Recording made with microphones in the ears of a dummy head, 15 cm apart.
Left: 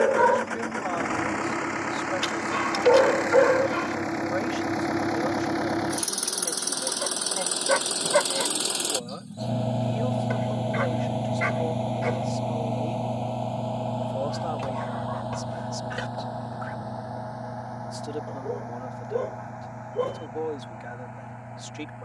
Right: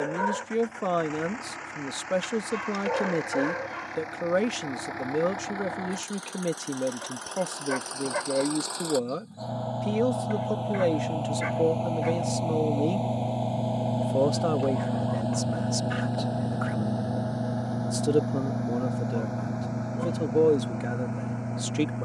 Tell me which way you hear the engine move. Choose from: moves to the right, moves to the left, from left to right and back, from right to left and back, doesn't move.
moves to the right.